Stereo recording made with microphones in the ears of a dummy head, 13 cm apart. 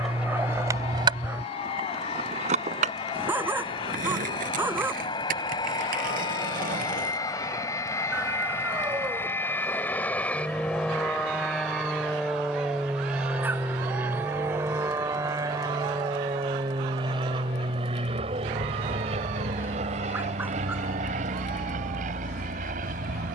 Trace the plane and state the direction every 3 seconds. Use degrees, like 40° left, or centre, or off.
50° left, 40° left, 30° left, 10° left, 10° right, 30° right, 50° right, 60° right.